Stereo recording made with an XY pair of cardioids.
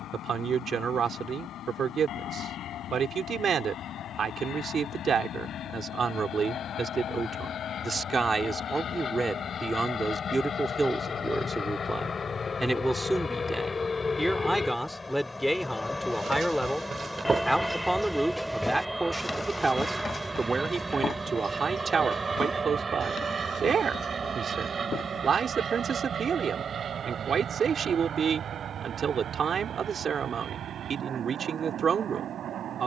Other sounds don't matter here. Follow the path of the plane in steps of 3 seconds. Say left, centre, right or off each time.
left, left, left, left, left, centre, centre, right, right, right, right.